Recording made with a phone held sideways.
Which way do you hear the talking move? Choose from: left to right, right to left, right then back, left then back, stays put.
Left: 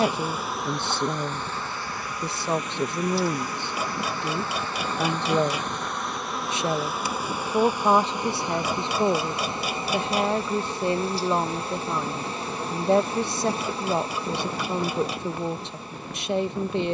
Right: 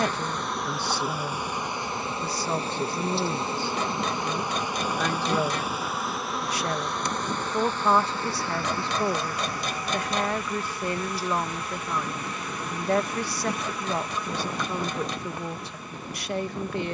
stays put.